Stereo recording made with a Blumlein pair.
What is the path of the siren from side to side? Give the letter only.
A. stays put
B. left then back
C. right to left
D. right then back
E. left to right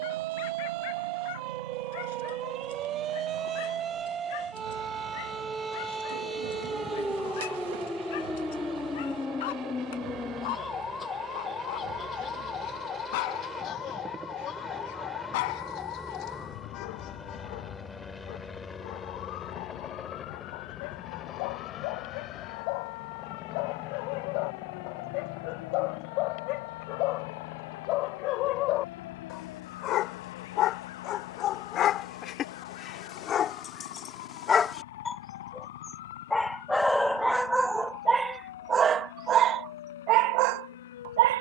C.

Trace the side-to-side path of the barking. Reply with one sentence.
You can hear the barking move from left to right.